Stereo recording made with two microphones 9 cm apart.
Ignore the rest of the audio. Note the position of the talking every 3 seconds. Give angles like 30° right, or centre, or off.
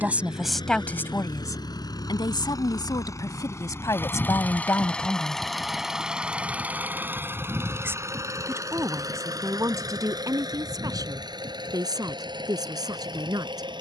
30° left, 40° left, 30° right, 40° right, 50° right.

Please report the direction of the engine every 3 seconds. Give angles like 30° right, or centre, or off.
50° left, 20° left, 30° right, 50° right, 60° right.